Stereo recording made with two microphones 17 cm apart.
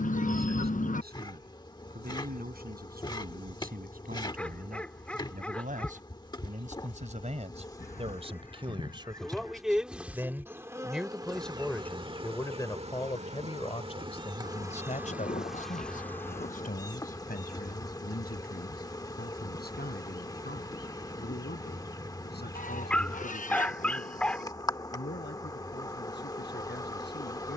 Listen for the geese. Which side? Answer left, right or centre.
left.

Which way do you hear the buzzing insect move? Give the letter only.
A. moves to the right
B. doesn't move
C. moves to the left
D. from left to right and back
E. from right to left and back
D.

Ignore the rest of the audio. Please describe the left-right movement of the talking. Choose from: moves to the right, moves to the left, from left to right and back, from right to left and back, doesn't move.
moves to the left.